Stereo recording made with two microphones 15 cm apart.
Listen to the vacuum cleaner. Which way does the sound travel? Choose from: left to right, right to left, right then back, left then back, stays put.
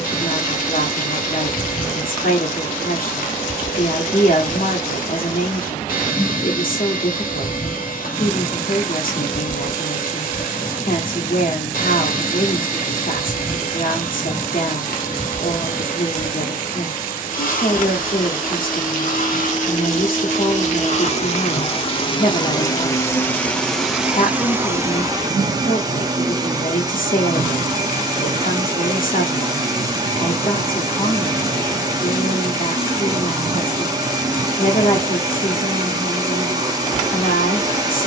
left to right.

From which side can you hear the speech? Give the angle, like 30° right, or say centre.
70° left.